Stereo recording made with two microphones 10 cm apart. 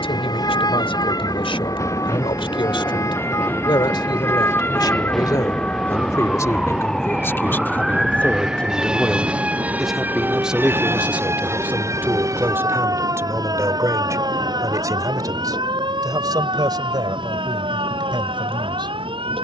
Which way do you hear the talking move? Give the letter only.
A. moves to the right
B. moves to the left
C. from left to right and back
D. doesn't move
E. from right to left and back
A.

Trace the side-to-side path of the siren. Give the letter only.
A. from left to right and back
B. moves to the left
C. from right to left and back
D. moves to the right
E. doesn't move
D.